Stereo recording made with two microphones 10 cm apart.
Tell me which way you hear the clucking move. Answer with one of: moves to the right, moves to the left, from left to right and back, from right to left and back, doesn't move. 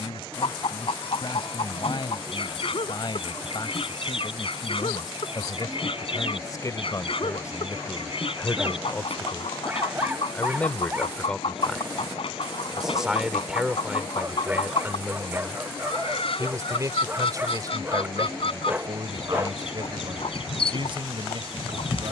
doesn't move.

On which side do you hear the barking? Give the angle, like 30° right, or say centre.
20° right.